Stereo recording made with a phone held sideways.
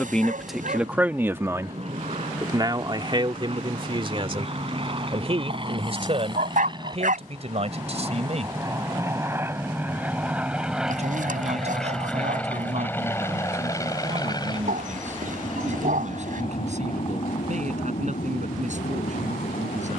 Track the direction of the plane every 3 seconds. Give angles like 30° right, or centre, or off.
50° right, 40° right, 30° right, 10° right, 20° left, 40° left, 50° left.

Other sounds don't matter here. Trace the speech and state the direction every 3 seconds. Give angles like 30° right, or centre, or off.
10° right, 40° right, 50° right, 50° right, 50° right, 50° right, 50° right.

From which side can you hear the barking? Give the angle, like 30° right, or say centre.
60° right.